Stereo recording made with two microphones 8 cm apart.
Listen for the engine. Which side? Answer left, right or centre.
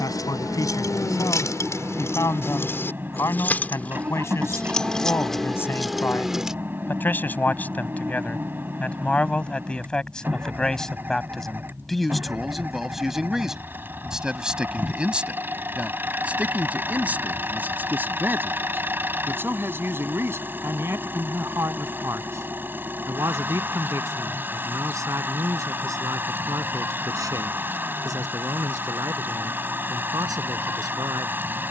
right.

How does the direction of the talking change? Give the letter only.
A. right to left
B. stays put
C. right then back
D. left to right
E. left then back
D.